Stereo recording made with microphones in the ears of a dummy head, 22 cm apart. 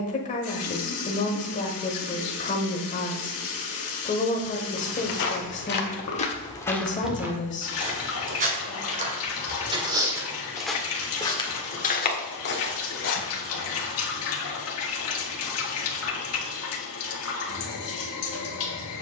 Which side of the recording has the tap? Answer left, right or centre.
left.